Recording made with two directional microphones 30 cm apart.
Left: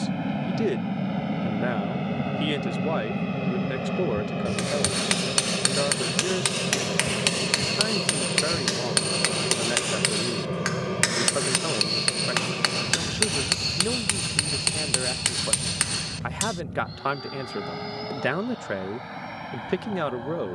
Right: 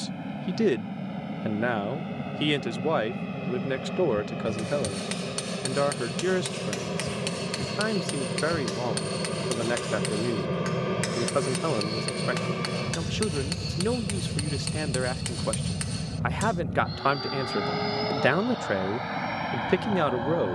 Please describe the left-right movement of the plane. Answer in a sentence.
In this clip you hear the plane move to the right.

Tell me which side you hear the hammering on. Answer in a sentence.
In this clip you hear the hammering on the left.